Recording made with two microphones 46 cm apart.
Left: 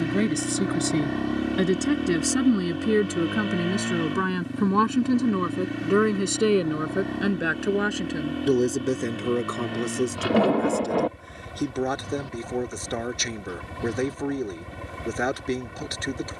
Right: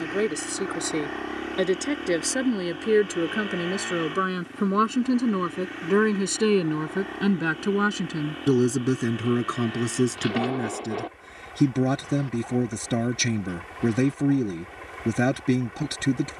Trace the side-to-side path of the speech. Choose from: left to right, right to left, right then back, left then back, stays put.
left to right.